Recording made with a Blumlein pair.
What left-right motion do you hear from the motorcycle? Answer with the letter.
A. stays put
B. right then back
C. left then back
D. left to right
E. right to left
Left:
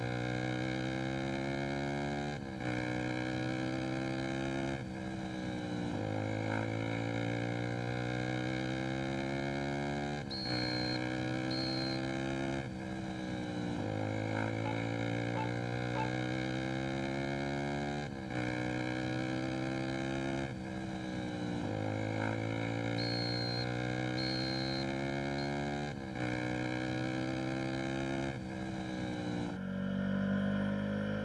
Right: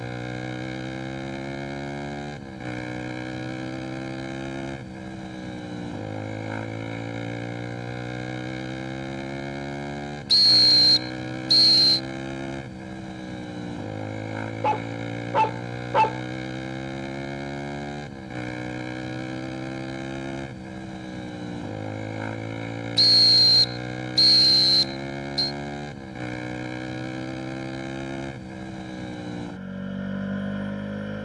A.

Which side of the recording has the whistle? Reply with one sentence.
You can hear the whistle on the right.